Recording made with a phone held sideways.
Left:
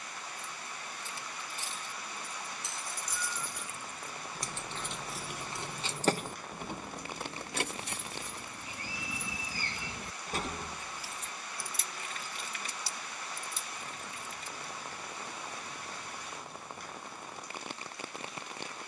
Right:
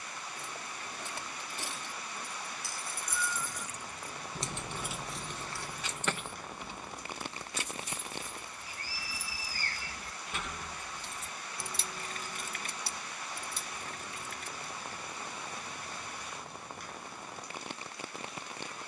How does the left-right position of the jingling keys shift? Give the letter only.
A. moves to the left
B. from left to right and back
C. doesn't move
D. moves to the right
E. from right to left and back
E.